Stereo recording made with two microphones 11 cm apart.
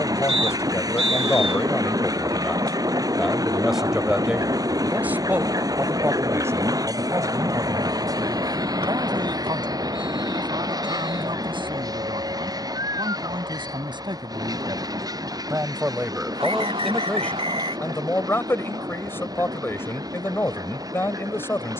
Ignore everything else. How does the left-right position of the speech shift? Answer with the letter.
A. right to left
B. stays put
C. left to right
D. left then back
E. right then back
E.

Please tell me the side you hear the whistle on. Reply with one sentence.
You can hear the whistle on the right.